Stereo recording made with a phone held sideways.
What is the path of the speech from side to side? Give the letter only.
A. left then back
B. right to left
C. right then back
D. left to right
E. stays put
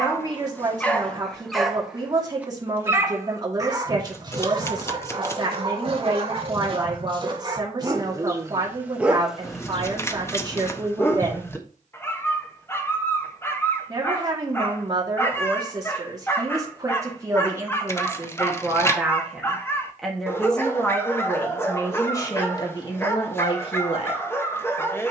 B.